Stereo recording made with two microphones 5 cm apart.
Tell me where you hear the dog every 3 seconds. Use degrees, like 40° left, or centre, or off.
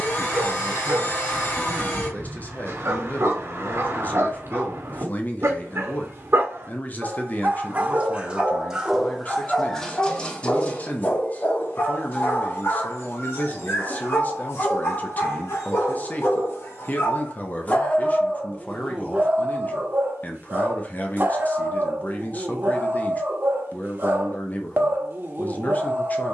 60° right, 60° right, 30° right, 20° left, 50° left, 50° left, 20° right, 40° right, 40° right.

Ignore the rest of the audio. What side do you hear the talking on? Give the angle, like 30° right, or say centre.
30° left.